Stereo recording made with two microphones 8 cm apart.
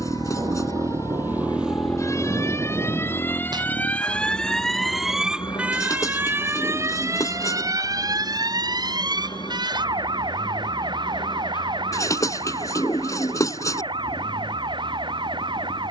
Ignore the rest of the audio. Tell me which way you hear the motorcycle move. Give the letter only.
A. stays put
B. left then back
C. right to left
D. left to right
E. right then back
C.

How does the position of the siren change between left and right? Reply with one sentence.
You can hear the siren travel towards the right.